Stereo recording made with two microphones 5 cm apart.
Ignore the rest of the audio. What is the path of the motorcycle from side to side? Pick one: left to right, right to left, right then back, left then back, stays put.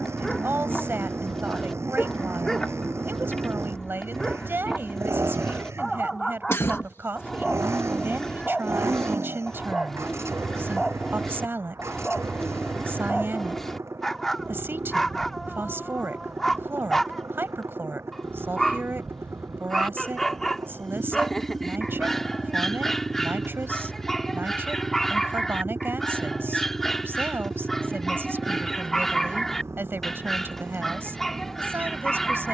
stays put.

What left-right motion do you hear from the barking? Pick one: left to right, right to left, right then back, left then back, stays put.
stays put.